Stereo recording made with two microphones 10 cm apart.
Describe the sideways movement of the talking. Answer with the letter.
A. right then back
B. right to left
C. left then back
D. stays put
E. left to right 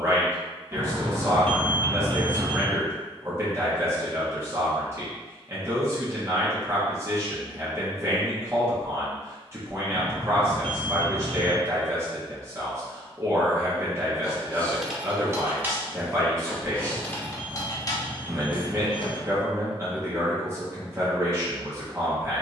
D.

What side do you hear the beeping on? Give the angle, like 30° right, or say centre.
80° right.